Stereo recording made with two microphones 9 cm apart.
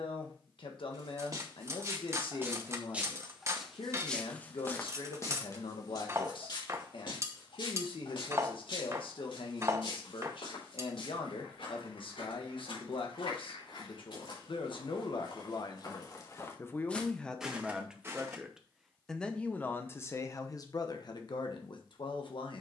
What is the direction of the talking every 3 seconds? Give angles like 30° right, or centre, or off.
70° left, 70° left, 70° left, 70° left, 70° left, 30° left, 20° left, 60° left.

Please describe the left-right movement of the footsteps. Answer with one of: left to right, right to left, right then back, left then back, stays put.
left then back.